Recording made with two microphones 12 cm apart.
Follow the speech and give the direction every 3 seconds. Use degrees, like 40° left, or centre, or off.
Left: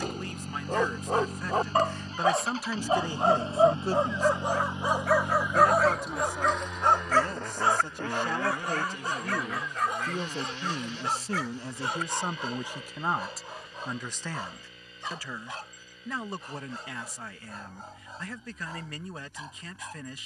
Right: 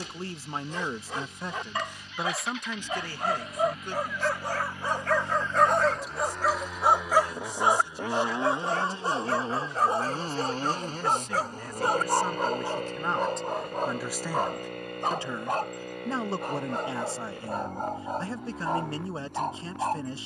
20° right, 40° left, 60° left, 40° left, centre, 30° right, 30° right.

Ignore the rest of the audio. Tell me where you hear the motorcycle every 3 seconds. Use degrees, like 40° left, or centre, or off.
40° left, 20° left, 10° right, 40° right, 60° right, 70° right, 70° right.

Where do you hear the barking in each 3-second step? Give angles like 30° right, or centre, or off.
50° left, 20° left, 20° right, 40° right, 50° right, 60° right, 60° right.